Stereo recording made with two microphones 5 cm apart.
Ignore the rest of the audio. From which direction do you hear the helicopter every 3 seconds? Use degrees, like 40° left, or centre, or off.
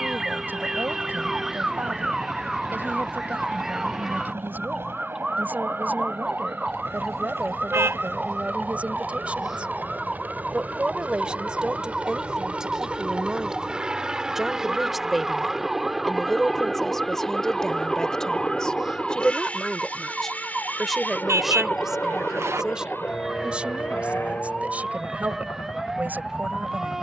60° right, 50° right, 50° right, 40° right, 20° right, centre, 20° left, 40° left, 50° left.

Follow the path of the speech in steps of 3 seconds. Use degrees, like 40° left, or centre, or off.
40° right, 40° right, 30° right, 20° right, 10° right, centre, 10° left, 10° right, 30° right.